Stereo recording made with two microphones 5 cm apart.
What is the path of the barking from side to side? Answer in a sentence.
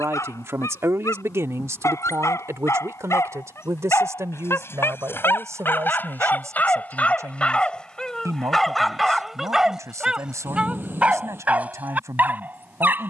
In this clip you hear the barking move to the right.